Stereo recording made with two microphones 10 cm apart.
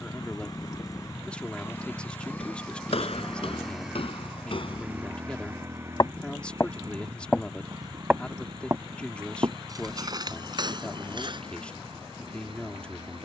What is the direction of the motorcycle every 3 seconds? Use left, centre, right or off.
left, centre, right, right, right.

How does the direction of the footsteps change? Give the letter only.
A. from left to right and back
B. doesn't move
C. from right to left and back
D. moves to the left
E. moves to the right
E.